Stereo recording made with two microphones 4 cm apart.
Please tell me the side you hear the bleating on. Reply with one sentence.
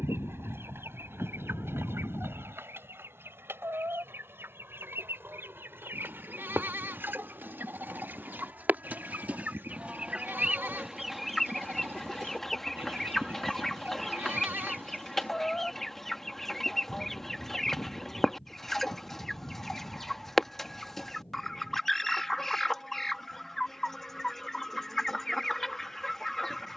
You can hear the bleating on the right.